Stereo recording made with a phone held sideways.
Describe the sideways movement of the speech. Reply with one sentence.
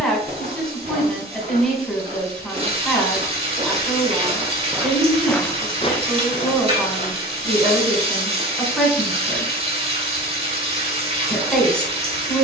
You can hear the speech stay put.